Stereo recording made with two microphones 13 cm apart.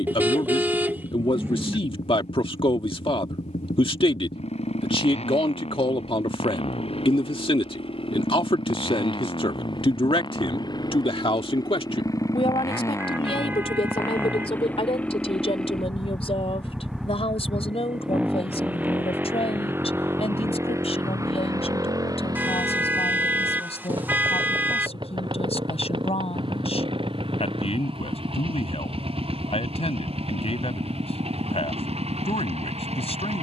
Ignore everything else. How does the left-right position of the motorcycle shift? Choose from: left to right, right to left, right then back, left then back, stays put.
left to right.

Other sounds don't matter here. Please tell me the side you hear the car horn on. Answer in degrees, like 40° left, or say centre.
10° right.